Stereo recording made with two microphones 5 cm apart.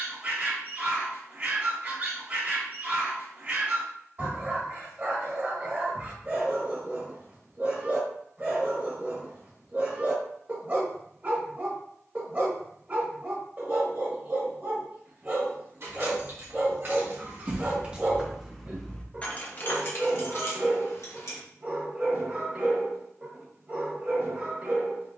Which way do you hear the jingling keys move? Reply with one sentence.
You can hear the jingling keys travel towards the left.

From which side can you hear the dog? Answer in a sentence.
You can hear the dog on the right.